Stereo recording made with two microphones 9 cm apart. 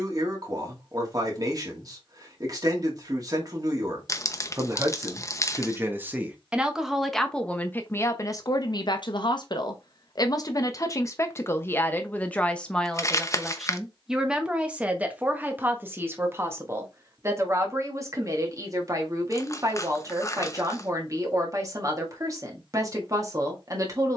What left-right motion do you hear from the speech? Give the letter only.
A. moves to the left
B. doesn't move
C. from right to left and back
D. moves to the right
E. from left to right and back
C.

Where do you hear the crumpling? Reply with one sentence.
In this clip you hear the crumpling on the left.